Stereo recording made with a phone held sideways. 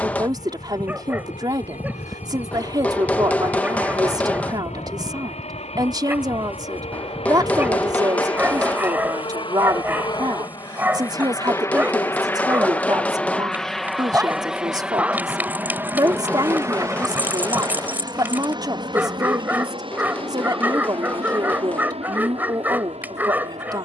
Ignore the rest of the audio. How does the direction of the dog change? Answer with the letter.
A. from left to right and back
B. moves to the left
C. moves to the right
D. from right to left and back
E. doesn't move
E.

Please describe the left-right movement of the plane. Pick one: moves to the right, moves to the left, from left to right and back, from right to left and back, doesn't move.
moves to the right.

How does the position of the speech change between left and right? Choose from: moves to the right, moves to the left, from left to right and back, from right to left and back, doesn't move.
doesn't move.